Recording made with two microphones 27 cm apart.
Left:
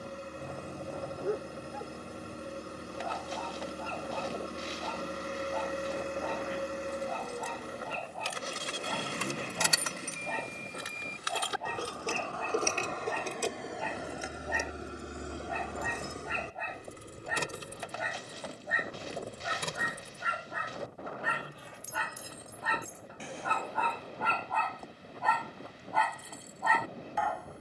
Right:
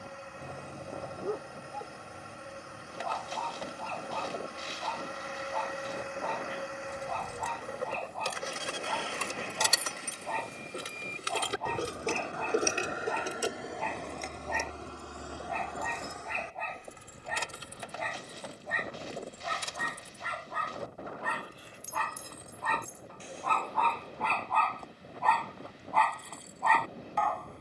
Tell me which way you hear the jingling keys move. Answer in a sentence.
In this clip you hear the jingling keys move from right to left.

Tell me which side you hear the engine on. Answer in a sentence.
In this clip you hear the engine on the left.